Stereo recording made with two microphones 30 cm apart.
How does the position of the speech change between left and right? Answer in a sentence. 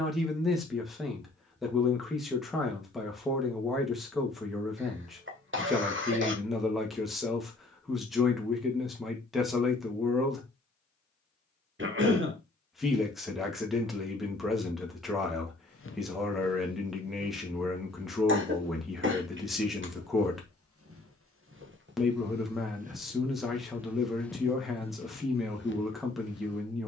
In this clip you hear the speech stay in one place.